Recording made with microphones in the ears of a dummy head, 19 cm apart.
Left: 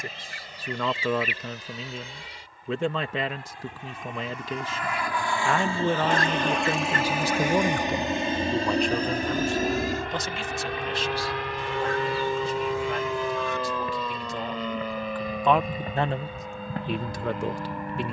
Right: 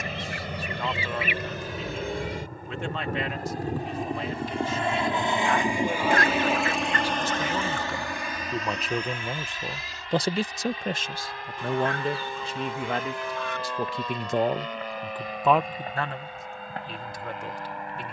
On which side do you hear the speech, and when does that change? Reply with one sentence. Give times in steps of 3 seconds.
You can hear the speech on the left from 0 s, on the right from 9 s and on the left from 15 s.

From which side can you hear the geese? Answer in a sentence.
You can hear the geese on the right.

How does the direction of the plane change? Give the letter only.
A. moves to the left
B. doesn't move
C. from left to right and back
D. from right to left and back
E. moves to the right
A.